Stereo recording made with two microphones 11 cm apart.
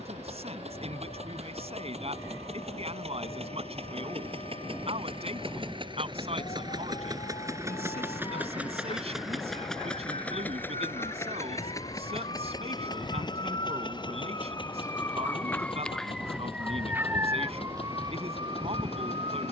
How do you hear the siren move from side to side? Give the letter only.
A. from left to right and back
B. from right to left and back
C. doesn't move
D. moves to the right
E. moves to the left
D.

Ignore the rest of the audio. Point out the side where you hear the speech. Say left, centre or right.
right.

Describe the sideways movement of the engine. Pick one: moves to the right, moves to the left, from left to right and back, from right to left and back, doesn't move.
moves to the left.